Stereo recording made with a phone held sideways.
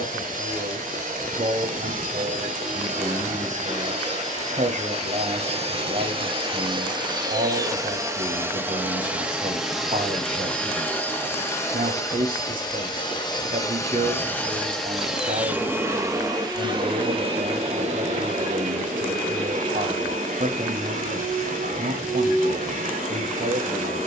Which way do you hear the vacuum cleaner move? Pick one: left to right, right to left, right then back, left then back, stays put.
left then back.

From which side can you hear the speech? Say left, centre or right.
right.